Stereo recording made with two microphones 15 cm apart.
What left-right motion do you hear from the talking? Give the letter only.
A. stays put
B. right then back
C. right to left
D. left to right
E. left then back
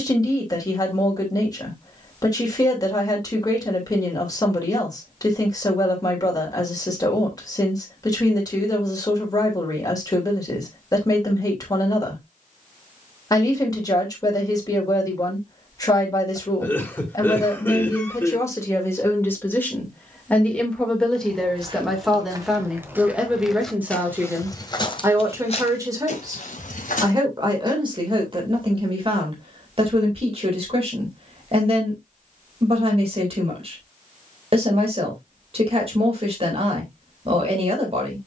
D.